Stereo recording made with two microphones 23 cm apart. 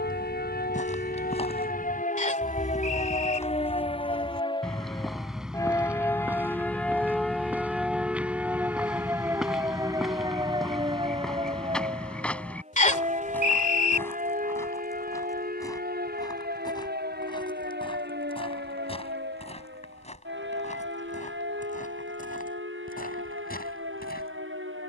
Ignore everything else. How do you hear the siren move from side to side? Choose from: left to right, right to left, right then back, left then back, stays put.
left to right.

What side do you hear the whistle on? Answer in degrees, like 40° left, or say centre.
30° left.